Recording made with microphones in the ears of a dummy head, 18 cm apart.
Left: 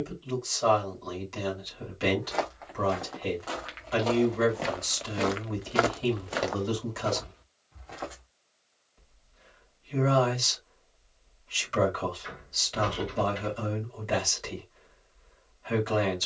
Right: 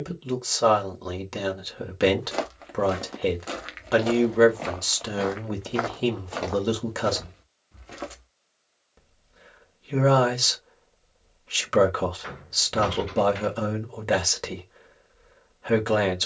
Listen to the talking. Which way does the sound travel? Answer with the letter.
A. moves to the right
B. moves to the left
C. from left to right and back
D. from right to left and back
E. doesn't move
E.